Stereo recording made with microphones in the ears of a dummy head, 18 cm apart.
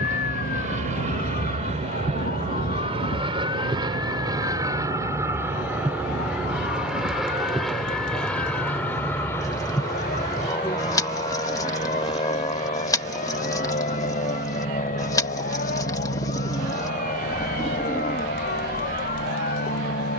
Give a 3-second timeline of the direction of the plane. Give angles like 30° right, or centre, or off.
40° right, 20° right, centre, 20° left, 30° left, 40° left, 50° left.